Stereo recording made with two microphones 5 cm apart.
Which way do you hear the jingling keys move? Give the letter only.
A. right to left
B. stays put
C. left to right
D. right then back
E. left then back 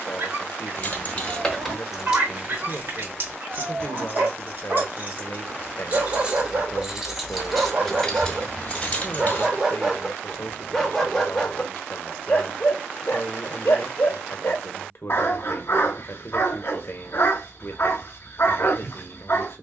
D.